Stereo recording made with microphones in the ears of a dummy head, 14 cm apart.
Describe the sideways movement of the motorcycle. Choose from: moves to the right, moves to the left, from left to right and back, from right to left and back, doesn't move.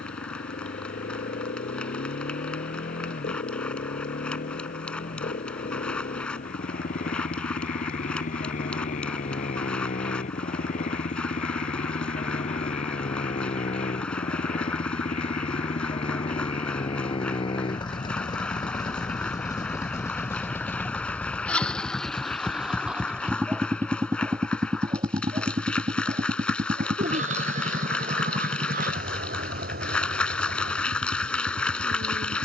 moves to the right.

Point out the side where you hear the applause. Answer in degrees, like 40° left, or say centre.
10° left.